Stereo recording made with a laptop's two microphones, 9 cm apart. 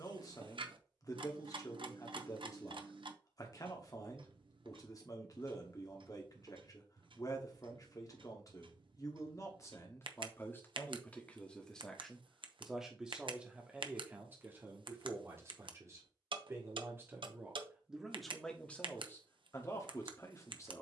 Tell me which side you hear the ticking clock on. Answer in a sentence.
You can hear the ticking clock on the right.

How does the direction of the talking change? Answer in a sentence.
In this clip you hear the talking move from left to right and back again.